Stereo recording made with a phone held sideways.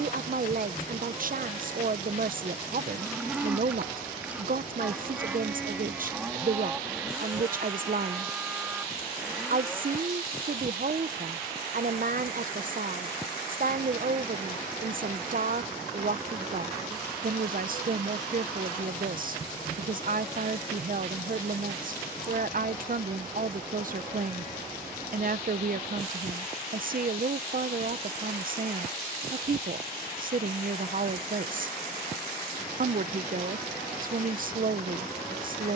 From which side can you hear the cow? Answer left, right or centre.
centre.